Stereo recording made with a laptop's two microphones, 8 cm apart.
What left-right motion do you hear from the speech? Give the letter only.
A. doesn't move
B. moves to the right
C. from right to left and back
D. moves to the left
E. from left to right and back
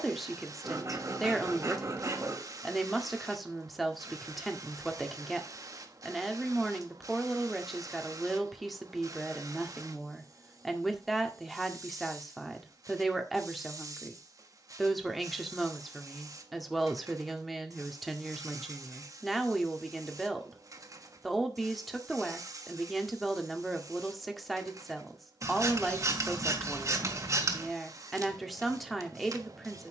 A.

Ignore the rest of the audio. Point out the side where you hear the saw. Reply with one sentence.
You can hear the saw on the right.